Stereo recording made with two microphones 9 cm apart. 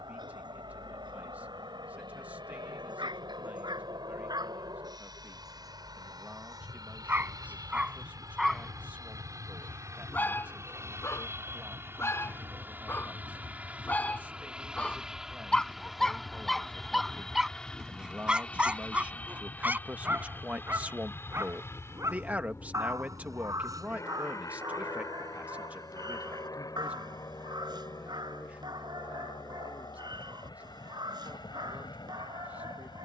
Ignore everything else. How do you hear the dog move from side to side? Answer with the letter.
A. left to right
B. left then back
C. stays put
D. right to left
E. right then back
B.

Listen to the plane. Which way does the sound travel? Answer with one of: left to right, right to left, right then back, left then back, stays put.
right to left.